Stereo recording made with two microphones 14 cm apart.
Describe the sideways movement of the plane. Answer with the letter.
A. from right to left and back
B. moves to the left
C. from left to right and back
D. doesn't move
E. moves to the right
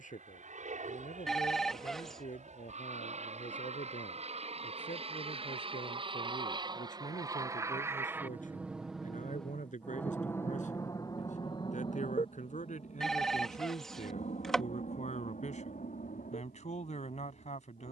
B.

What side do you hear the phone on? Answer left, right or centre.
centre.